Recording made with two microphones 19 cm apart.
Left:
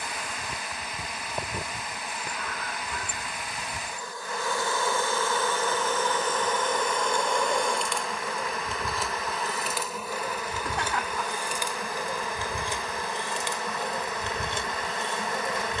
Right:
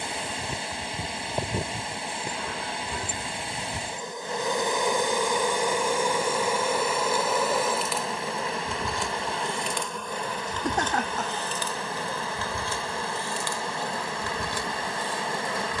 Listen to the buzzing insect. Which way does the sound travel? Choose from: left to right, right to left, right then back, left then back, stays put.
right to left.